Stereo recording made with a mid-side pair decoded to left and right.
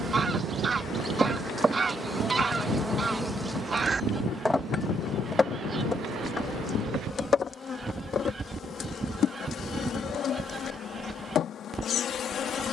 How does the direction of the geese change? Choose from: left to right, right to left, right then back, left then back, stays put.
stays put.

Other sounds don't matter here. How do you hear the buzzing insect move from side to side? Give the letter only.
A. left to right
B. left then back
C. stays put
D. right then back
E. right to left
E.